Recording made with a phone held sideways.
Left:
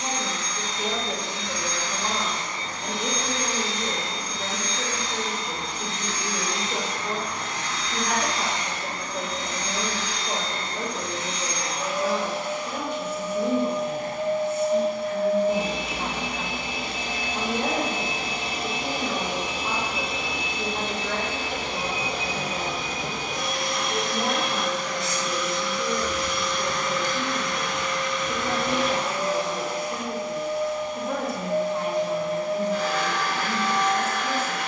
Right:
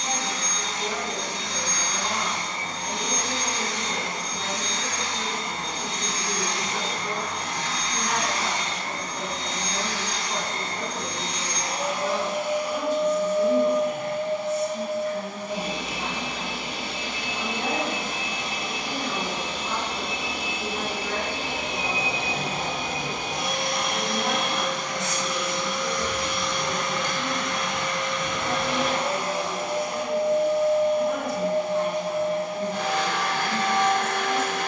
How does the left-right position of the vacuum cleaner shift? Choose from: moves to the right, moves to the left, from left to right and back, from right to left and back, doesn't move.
from right to left and back.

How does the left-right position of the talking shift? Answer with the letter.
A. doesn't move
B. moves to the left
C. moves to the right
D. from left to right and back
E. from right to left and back
A.